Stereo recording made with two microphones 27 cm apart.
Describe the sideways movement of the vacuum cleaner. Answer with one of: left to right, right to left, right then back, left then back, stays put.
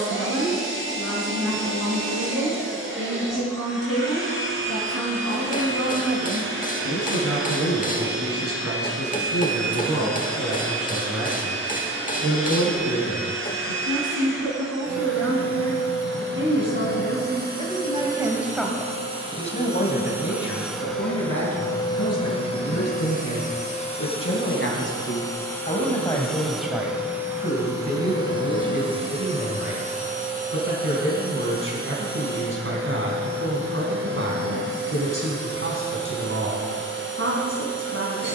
left then back.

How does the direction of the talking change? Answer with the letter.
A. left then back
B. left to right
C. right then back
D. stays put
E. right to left
A.